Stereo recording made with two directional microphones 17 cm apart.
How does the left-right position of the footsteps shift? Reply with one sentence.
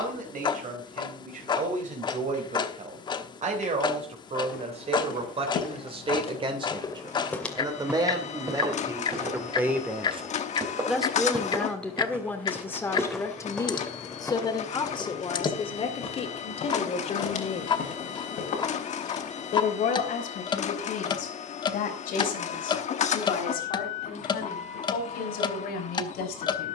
In this clip you hear the footsteps go right and come back.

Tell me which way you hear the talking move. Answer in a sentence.
In this clip you hear the talking travel towards the left.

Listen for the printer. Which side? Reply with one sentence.
You can hear the printer on the left.